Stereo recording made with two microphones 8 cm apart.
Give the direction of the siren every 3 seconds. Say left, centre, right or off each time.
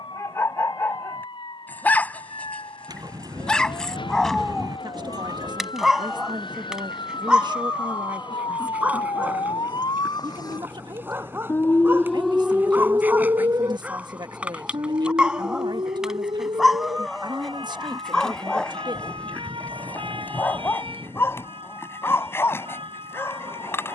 left, left, left, left, right, right, right, right.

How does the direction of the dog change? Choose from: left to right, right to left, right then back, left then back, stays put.
right then back.